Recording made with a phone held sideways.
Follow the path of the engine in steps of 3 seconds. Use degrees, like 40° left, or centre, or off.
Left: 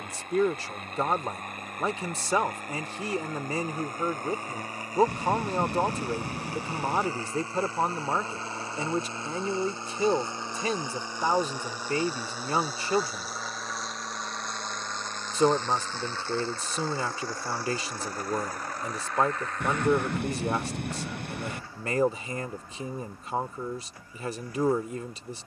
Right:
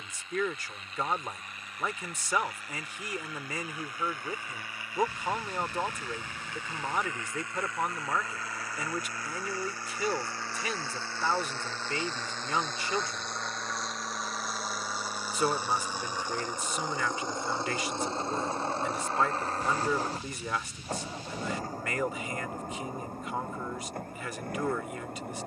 50° left, 40° left, 30° left, 20° left, centre, 10° right, 30° right, 40° right, 50° right.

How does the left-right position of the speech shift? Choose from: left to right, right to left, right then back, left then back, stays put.
stays put.